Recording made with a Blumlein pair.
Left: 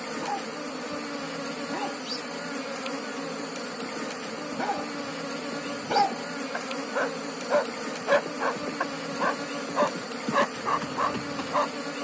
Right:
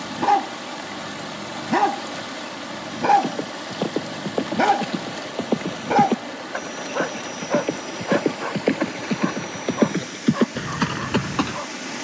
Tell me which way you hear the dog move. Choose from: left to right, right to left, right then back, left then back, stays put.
right to left.